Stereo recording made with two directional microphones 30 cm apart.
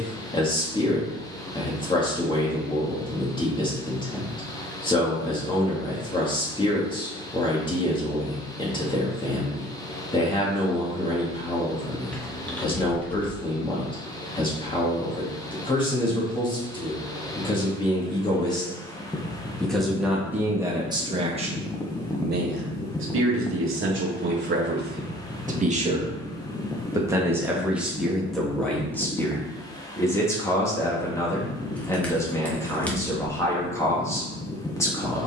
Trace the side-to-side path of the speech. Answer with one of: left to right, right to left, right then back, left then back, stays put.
right then back.